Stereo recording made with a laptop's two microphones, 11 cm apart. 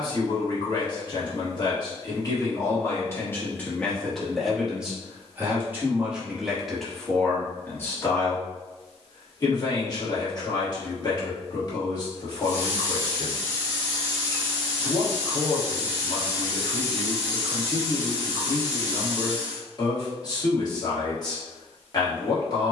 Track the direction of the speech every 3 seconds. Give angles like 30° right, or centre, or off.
40° left, centre, 10° left, 40° left, 40° left, 40° left, 40° left, 40° left.